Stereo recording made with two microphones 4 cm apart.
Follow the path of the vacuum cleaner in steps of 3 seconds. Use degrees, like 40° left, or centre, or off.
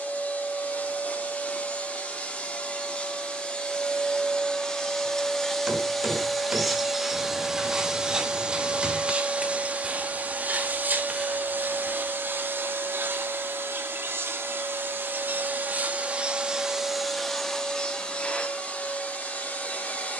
30° left, 20° left, 10° right, 40° right, 60° right, 20° right, 30° left.